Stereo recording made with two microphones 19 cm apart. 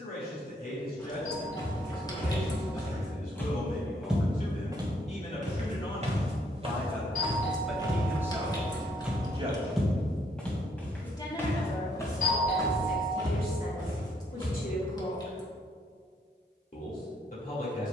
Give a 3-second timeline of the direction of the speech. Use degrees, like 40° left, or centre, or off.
50° left, 40° left, centre, 10° left, 50° left, 50° left.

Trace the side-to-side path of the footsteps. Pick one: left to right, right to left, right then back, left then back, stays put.
right then back.